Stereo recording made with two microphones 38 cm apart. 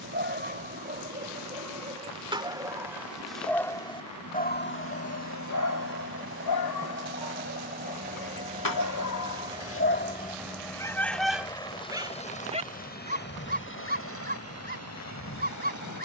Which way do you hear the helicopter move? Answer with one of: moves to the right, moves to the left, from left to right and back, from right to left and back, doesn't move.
moves to the left.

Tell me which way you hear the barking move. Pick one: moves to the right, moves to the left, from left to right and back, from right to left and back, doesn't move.
from right to left and back.